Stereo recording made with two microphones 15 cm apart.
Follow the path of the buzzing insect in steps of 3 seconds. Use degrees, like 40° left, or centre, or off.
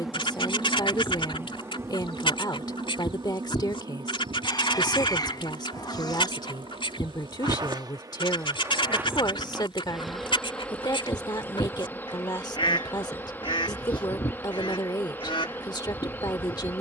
20° right, 40° right, 30° right, centre, 10° left, 10° left.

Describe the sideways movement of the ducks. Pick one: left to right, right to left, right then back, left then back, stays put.
stays put.